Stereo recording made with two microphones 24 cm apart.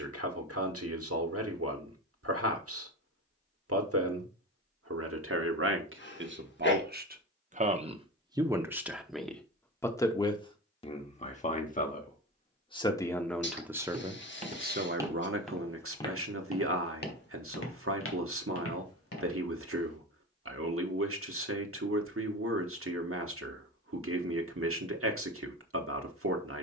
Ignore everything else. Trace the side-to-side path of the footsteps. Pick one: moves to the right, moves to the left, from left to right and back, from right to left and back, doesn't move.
moves to the left.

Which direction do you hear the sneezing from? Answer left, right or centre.
left.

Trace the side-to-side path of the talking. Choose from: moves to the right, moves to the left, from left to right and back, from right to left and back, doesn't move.
from right to left and back.